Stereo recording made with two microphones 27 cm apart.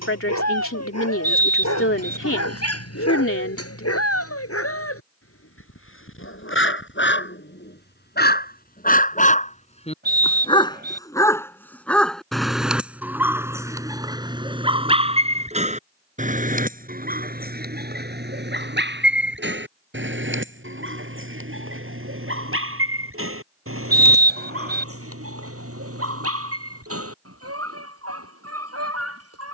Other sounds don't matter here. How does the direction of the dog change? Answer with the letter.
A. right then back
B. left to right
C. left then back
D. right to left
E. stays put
B.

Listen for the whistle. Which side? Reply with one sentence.
You can hear the whistle on the right.